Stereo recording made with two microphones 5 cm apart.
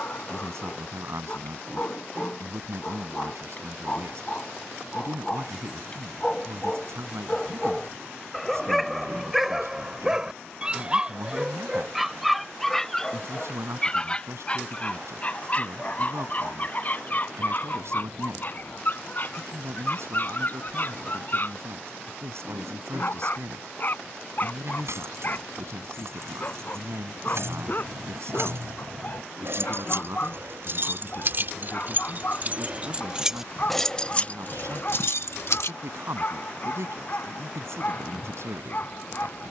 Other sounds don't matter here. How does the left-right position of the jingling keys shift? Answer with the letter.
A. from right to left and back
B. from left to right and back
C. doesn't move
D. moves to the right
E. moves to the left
E.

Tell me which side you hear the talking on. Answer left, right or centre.
right.